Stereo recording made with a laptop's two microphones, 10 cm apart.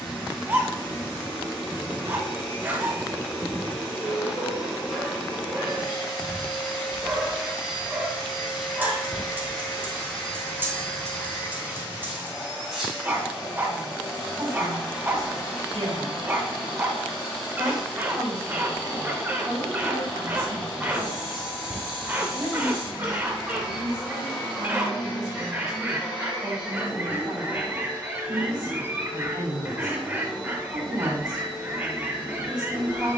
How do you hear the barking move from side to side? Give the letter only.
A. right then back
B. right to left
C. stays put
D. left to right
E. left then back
C.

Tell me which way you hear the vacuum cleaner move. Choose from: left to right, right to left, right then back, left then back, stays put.
stays put.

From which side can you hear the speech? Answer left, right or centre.
right.